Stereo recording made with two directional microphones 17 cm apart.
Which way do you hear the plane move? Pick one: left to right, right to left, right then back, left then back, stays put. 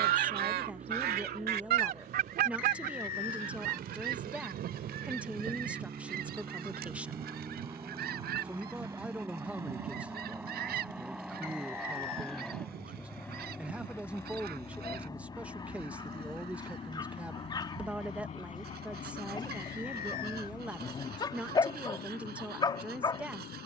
right to left.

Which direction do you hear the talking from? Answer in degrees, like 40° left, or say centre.
10° right.